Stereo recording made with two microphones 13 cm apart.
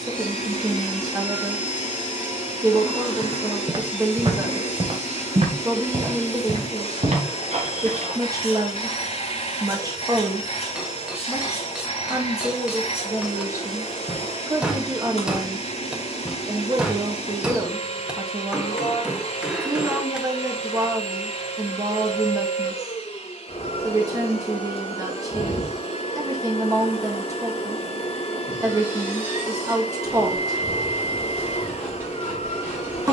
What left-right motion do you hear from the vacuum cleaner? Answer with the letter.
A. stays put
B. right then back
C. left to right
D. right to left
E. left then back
A.